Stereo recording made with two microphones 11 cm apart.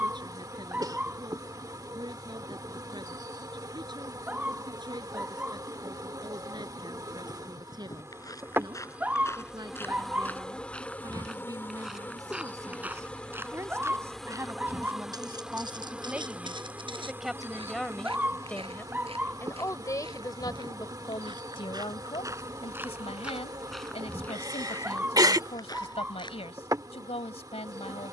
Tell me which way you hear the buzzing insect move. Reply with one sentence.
You can hear the buzzing insect move from right to left and back again.